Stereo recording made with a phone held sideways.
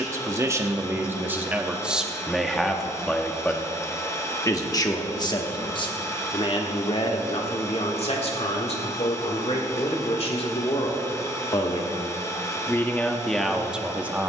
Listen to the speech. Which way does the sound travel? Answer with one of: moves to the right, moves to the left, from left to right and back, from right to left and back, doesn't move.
from right to left and back.